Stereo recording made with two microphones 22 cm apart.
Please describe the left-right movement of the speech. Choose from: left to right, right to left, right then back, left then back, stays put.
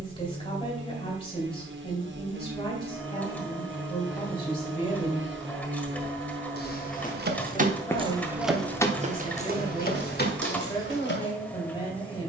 stays put.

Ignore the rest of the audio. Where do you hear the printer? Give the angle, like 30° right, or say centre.
10° left.